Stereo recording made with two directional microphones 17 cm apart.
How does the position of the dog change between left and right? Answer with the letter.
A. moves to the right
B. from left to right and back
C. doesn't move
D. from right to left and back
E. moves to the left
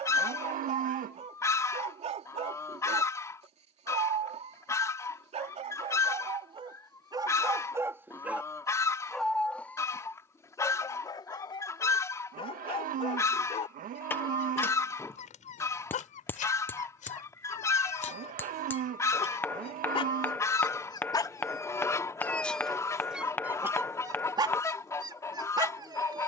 D.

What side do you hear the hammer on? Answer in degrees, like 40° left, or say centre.
10° left.